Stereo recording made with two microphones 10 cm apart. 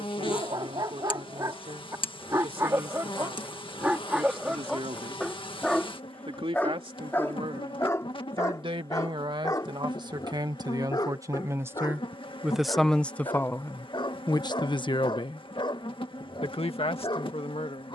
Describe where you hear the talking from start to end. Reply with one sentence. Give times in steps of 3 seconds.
You can hear the talking on the right from 0 s and on the left from 12 s.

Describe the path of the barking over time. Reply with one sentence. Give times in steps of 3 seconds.
You can hear the barking on the right from 0 s, in the centre from 3 s and on the left from 6 s.